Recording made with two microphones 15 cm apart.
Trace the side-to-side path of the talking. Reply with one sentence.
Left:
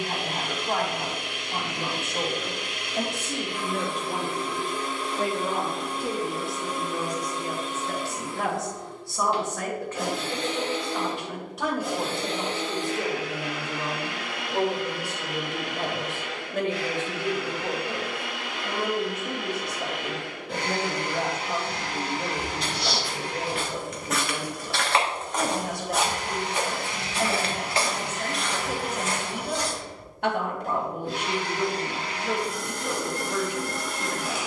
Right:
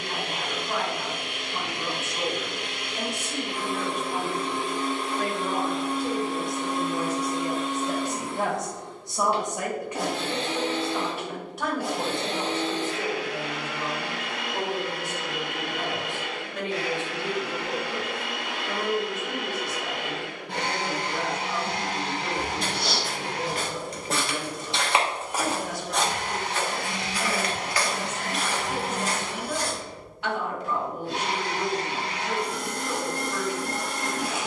In this clip you hear the talking move from left to right and back again.